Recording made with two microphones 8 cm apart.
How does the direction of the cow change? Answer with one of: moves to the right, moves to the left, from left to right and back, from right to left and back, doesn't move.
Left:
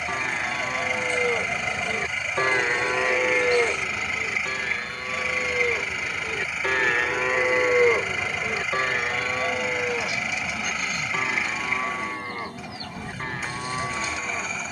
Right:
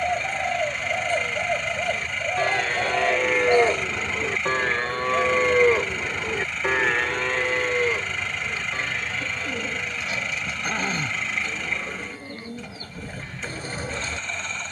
from left to right and back.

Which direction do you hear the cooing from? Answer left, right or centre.
right.